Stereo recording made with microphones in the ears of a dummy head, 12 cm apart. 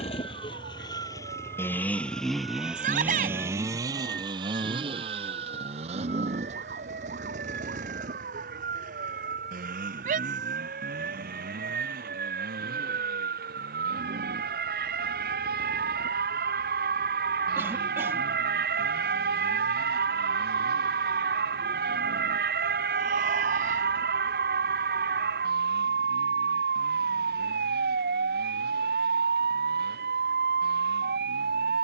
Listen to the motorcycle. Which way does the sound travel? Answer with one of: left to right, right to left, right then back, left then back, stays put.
left to right.